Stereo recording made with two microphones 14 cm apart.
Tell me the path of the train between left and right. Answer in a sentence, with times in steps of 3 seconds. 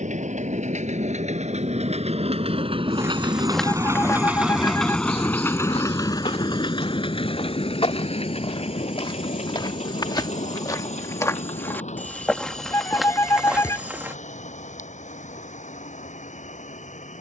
You can hear the train on the right from 0 s, in the centre from 3 s and on the left from 6 s.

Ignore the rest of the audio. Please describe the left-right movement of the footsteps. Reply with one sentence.
In this clip you hear the footsteps go left and come back.